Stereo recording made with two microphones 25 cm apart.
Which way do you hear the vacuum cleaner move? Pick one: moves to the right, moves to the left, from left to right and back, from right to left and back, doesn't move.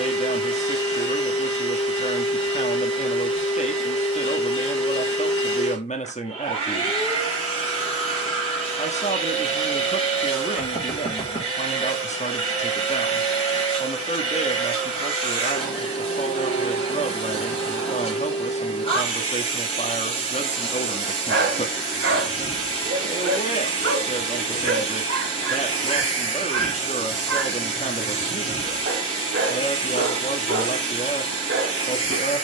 doesn't move.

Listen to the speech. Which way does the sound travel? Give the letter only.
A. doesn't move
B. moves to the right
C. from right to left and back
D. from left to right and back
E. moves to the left
A.